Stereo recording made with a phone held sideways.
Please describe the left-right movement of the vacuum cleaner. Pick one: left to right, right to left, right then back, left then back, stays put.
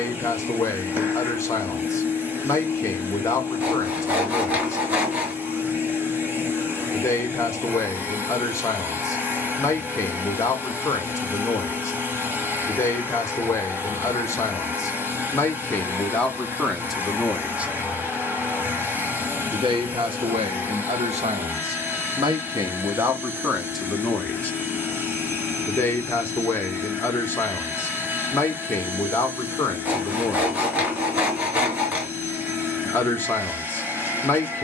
stays put.